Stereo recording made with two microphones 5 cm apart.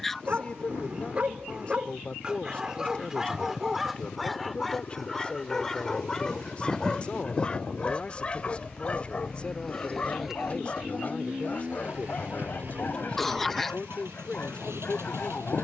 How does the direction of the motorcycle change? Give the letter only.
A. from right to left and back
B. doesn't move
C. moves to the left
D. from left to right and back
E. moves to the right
E.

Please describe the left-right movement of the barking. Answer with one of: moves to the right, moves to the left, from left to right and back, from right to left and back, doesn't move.
moves to the left.